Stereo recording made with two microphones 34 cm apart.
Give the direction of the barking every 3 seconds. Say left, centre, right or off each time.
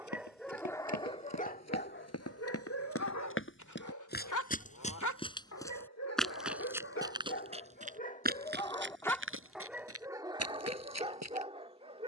left, left, left, centre.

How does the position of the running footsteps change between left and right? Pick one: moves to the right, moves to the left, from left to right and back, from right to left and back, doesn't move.
moves to the right.